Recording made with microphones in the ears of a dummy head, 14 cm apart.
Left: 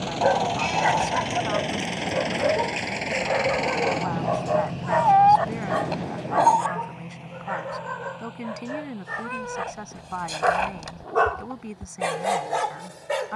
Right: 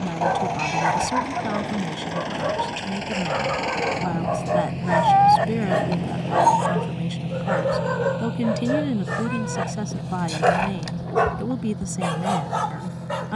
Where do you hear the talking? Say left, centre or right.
right.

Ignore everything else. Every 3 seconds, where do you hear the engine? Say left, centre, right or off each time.
left, centre, right, right, right.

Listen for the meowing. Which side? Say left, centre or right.
centre.